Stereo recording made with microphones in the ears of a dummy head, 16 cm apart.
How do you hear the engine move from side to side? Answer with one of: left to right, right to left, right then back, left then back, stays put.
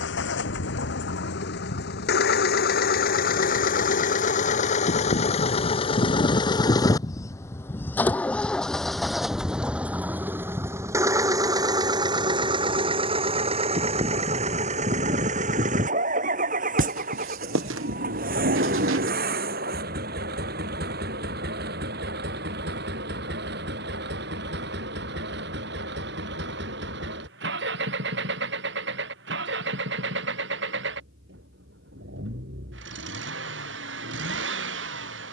left to right.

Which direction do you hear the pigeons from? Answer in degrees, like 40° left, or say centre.
70° right.